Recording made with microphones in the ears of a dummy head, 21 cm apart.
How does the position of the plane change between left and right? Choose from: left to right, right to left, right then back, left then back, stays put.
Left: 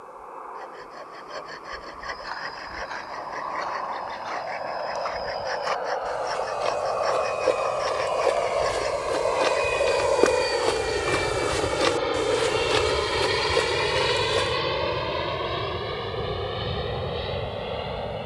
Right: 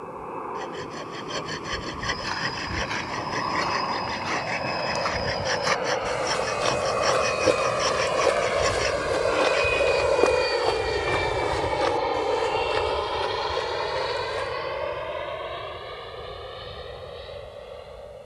right to left.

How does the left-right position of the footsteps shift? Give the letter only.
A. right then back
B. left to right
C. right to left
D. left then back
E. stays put
C.